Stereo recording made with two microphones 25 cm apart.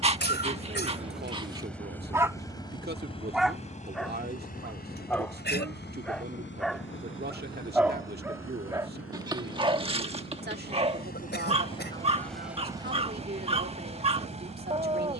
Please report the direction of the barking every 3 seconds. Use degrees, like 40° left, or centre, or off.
20° right, centre, centre, 20° right, 20° right.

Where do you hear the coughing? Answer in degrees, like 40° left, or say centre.
40° left.